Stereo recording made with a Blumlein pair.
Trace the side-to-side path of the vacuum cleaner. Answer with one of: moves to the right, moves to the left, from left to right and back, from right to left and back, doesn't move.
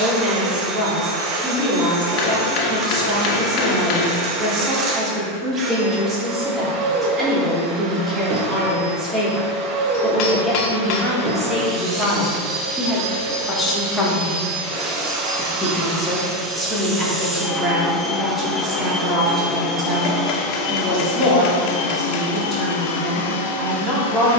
moves to the left.